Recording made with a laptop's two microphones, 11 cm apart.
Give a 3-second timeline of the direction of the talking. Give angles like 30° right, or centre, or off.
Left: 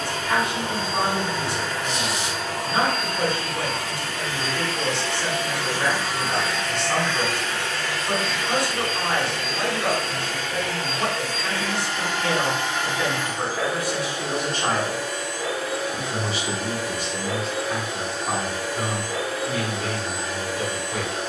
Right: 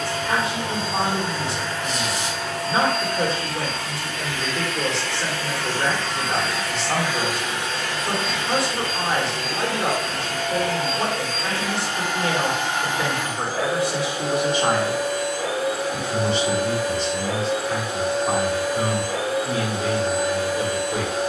40° right, 40° right, 40° right, 40° right, 30° right, centre, 30° right.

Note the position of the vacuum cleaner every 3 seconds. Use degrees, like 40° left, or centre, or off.
50° left, 30° left, 20° right, 50° right, 60° right, 60° right, 60° right.